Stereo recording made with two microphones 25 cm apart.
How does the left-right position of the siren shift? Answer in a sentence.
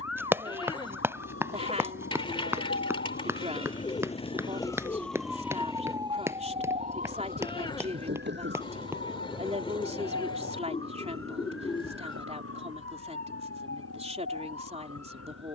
In this clip you hear the siren go from the left side to the right.